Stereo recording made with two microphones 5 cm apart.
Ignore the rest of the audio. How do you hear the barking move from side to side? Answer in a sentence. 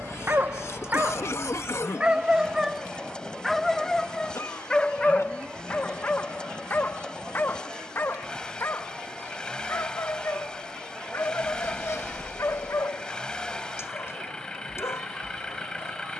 In this clip you hear the barking move from right to left.